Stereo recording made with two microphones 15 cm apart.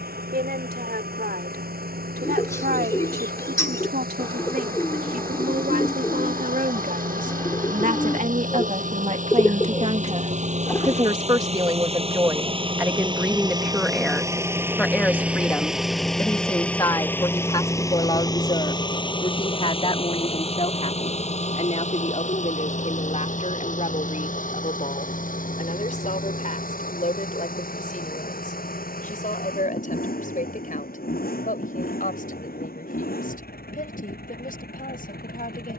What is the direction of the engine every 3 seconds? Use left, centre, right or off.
right, right, right, right, right, centre, left, left, left, left, left, left.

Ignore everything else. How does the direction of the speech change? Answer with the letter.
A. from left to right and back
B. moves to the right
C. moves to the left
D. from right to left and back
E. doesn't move
C.